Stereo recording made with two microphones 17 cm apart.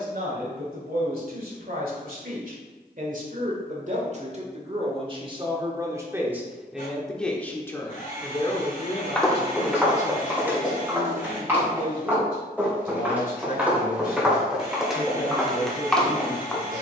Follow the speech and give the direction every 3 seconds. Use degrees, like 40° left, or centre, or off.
60° right, 40° right, 10° left, 50° left, 60° left, 70° left.